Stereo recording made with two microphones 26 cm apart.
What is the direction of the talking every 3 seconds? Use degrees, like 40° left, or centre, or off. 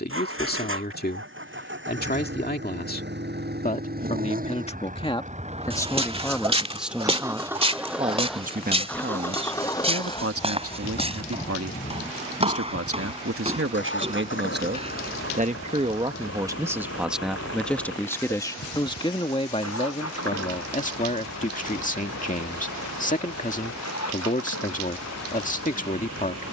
40° left, 20° left, 10° right, 60° right, 50° right, 10° right, 20° left, 30° left, 30° left.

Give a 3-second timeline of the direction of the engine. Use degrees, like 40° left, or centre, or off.
50° right, 30° right, 10° right, 20° left, 40° left, 60° left, 60° left, 70° left, 70° left.